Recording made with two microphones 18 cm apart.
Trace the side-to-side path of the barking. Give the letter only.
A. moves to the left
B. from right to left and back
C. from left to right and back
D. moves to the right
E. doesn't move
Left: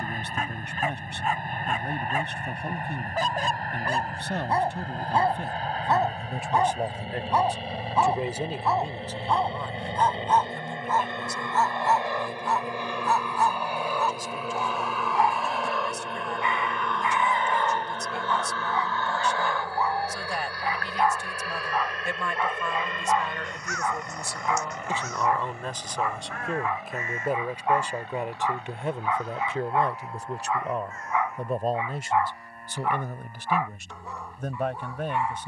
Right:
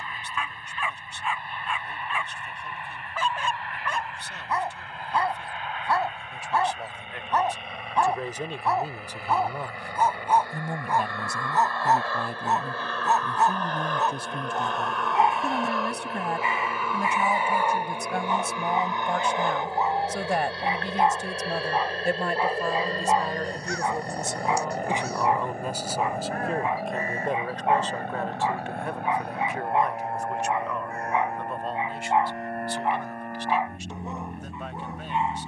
D.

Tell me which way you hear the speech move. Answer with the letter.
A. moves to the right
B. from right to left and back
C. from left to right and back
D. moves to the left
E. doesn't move
C.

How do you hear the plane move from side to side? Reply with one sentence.
In this clip you hear the plane travel towards the right.